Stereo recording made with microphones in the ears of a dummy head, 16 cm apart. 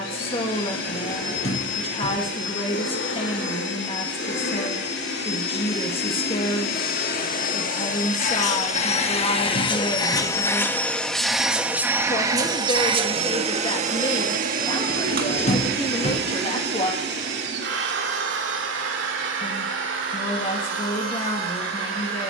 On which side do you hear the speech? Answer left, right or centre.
left.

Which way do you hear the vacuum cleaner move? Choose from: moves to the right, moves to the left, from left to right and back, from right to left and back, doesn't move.
moves to the right.